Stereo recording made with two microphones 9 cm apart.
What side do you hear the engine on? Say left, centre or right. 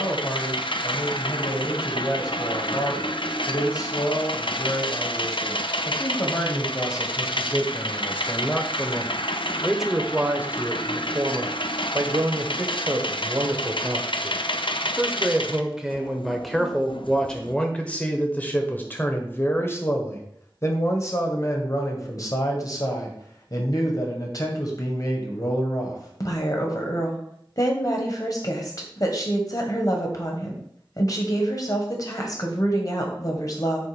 left.